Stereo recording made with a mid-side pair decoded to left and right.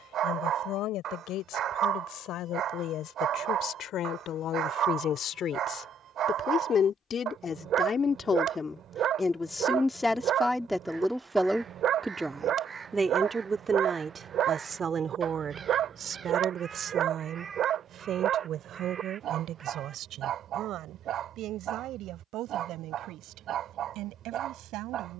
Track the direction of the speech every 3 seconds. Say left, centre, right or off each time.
left, left, left, centre, right, right, right, right, right.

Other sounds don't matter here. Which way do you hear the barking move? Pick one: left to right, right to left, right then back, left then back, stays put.
stays put.